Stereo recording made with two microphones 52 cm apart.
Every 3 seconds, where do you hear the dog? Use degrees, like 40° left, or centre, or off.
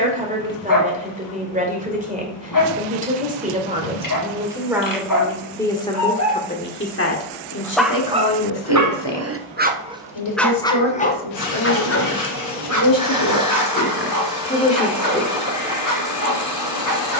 40° left, 40° left, centre, centre, 40° left, 40° left.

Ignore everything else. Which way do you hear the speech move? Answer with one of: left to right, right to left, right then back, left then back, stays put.
left then back.